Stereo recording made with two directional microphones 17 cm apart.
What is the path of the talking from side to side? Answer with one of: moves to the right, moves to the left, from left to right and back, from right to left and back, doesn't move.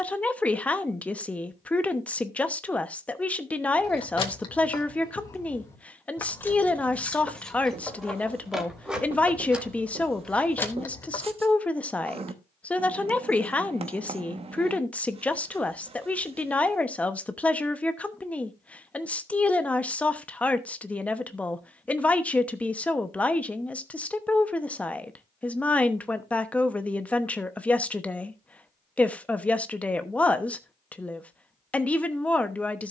doesn't move.